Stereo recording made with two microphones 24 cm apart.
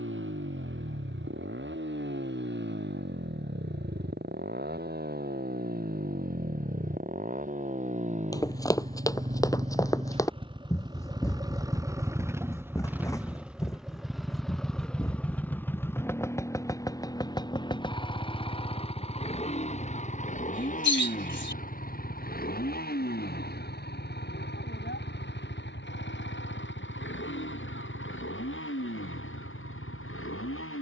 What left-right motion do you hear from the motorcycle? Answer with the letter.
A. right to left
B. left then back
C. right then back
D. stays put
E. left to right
A.